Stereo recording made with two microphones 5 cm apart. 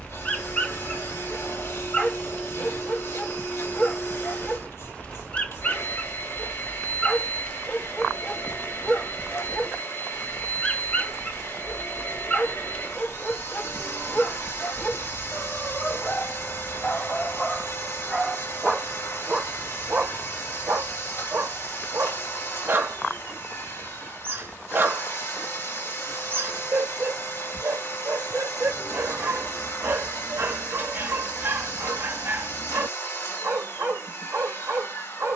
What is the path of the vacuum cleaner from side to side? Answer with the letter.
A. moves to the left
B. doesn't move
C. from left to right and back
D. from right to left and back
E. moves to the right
B.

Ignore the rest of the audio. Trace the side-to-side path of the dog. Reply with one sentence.
In this clip you hear the dog move to the right.